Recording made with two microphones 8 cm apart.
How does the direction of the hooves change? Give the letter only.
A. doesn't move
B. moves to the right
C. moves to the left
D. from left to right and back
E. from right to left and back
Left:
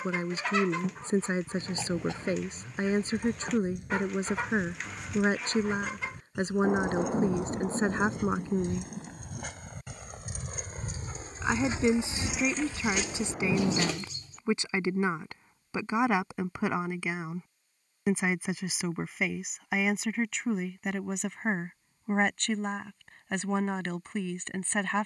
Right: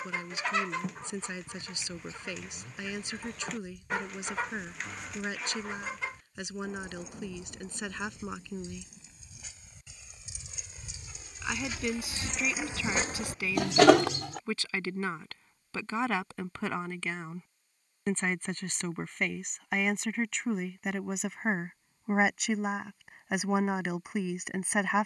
B.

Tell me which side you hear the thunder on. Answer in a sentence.
You can hear the thunder on the left.